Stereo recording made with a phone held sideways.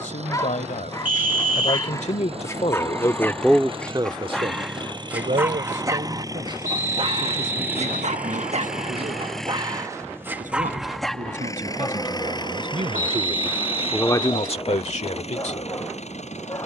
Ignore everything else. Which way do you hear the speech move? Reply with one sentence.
You can hear the speech move from left to right and back again.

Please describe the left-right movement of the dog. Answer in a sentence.
In this clip you hear the dog go right and come back.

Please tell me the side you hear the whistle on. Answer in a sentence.
In this clip you hear the whistle on the right.